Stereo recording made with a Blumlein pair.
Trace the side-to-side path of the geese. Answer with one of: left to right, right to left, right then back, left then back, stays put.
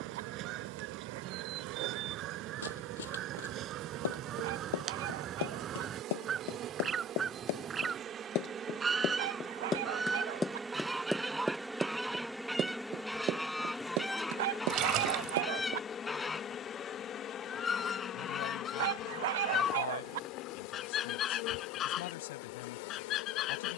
right to left.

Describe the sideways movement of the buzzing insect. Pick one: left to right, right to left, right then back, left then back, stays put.
right to left.